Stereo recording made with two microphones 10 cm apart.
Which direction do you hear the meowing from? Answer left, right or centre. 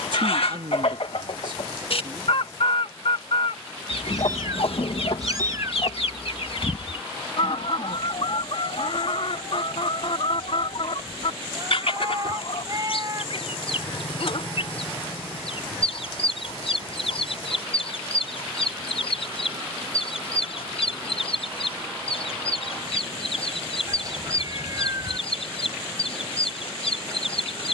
right.